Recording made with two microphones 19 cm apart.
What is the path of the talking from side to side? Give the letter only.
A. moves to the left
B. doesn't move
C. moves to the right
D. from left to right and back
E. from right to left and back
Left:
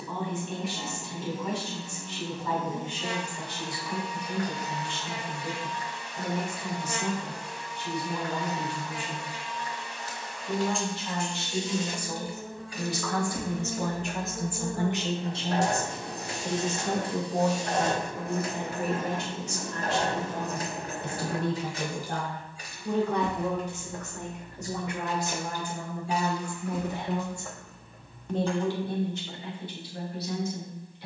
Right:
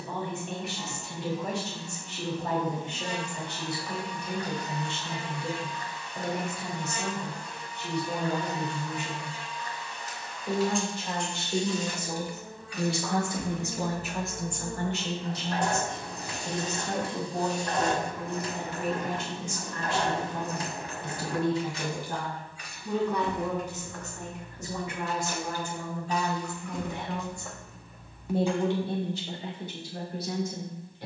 E.